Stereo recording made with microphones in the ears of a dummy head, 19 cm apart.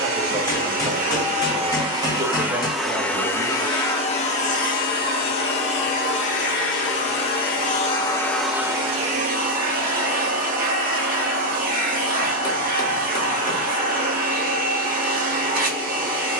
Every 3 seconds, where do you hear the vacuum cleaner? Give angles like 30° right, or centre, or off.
30° right, 30° left, 30° left, 40° right, 40° right, 40° right.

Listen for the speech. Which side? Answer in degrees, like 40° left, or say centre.
20° right.